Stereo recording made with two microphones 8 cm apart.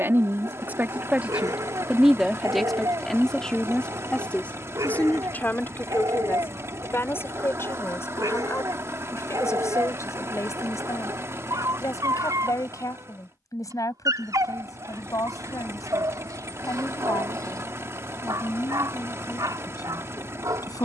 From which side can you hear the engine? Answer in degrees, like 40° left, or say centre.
30° right.